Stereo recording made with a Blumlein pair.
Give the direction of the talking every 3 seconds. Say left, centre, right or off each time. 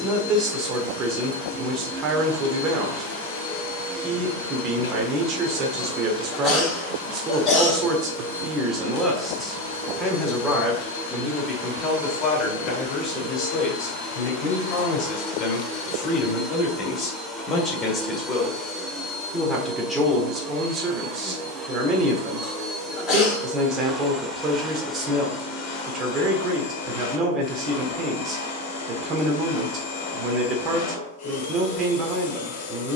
right, right, right, centre, left, left, centre, right, right, right, right.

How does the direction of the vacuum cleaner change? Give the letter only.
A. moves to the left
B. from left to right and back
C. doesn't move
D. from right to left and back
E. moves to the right
B.